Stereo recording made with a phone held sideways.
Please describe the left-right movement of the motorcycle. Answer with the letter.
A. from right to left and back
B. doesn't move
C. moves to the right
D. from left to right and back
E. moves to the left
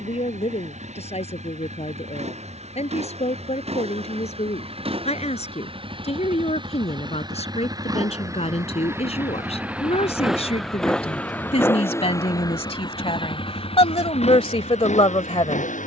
E.